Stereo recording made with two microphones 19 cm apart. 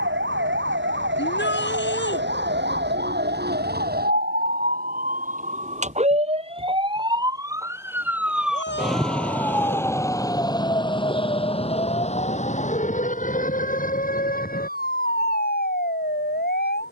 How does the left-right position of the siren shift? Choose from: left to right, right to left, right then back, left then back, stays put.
right to left.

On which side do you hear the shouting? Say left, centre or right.
left.